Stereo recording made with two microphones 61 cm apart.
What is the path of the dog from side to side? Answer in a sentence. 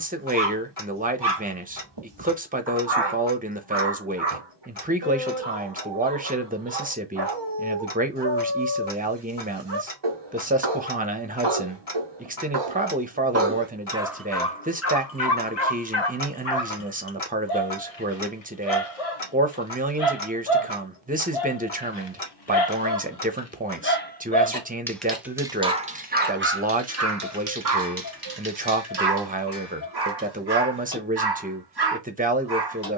In this clip you hear the dog move from right to left and back again.